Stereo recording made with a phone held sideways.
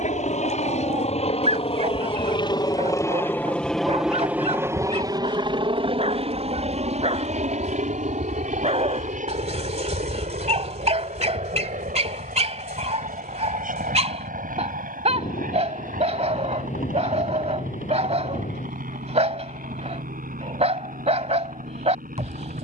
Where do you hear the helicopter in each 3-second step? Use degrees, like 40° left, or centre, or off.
50° left, 10° right, 60° right, 70° right, 70° right, 80° right, 80° right, 80° right.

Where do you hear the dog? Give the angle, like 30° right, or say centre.
50° right.